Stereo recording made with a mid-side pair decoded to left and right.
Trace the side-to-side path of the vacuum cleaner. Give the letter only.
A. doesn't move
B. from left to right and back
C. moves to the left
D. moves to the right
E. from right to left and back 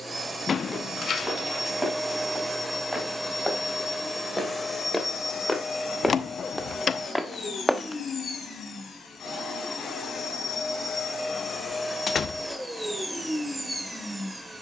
E.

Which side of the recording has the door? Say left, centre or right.
left.